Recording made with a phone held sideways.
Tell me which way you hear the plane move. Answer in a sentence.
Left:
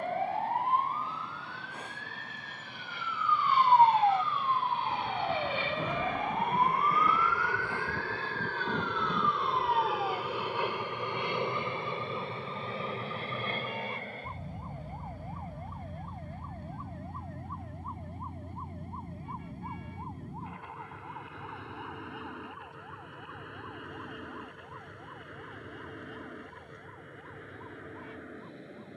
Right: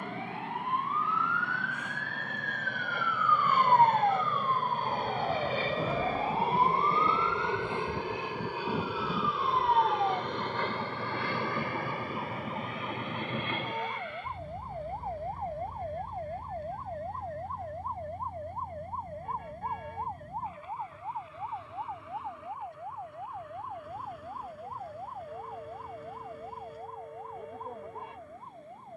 You can hear the plane move to the left.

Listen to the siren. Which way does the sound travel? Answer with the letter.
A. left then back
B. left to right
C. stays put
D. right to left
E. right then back
B.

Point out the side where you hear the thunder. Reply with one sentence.
You can hear the thunder in the centre.